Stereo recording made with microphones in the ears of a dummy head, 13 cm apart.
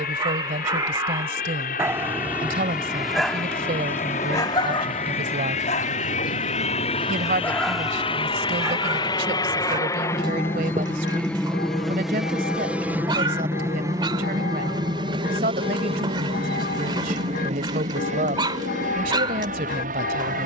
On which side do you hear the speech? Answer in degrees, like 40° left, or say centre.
60° right.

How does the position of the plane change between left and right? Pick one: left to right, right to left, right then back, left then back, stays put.
left to right.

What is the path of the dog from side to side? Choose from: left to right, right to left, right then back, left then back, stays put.
left then back.